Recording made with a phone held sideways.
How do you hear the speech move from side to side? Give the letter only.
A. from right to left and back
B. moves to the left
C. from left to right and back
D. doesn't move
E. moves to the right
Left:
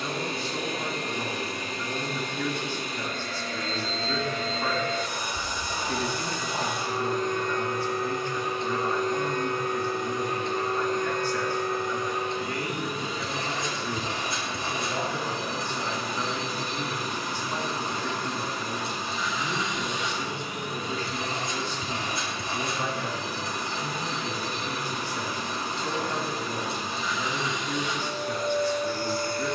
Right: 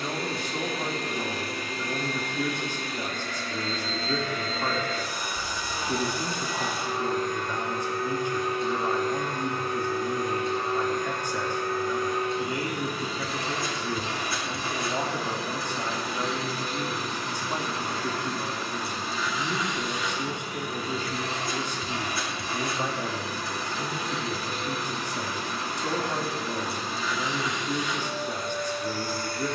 D.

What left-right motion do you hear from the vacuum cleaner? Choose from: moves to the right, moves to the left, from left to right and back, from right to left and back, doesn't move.
doesn't move.